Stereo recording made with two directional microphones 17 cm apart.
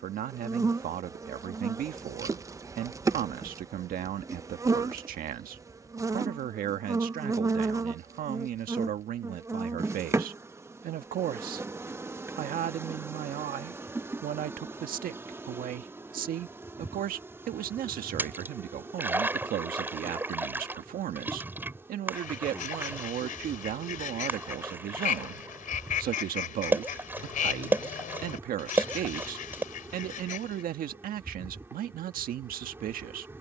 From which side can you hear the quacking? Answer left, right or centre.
left.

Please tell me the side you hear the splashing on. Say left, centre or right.
centre.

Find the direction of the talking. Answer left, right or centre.
right.